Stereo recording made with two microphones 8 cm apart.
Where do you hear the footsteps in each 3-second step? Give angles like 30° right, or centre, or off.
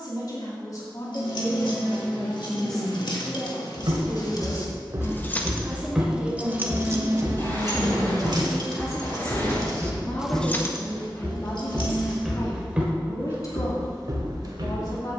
off, 40° right, 20° left, 20° left, 30° right.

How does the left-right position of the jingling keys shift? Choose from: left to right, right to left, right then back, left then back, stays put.
right then back.